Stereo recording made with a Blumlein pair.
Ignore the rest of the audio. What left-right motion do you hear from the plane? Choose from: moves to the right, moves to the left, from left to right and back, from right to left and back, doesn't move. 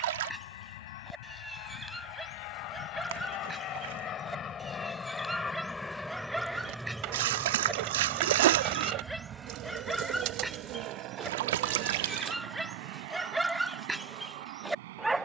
moves to the right.